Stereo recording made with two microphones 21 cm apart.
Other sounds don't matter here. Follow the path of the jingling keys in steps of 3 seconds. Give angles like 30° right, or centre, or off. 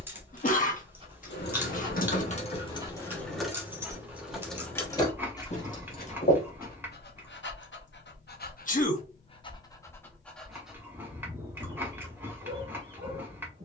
40° left, 10° left, 50° left, off, off.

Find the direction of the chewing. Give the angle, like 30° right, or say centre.
10° right.